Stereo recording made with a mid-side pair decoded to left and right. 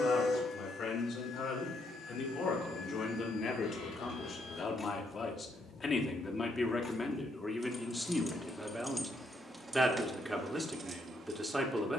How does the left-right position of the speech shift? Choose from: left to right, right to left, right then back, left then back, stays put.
left to right.